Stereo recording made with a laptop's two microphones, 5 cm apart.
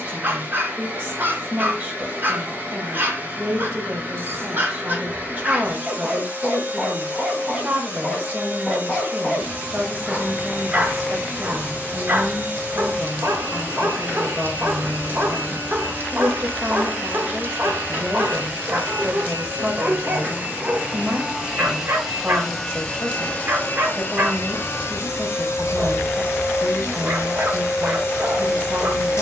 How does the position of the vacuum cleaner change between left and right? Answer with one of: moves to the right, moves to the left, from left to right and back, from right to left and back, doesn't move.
moves to the left.